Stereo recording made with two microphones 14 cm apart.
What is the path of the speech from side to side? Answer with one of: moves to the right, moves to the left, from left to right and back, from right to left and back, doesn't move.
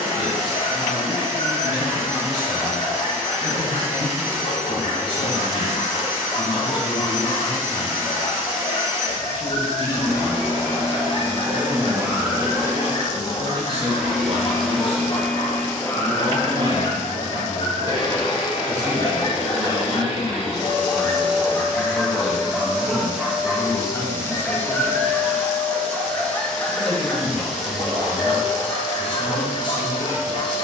from left to right and back.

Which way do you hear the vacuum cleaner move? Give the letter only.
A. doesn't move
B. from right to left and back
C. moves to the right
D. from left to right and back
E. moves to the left
B.